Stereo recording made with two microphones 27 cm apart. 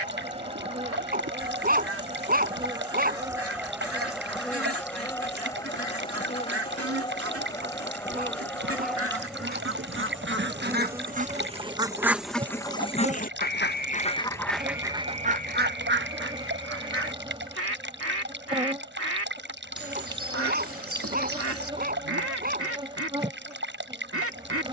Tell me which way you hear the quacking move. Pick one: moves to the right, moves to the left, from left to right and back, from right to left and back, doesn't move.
from right to left and back.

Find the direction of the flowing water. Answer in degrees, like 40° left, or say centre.
40° right.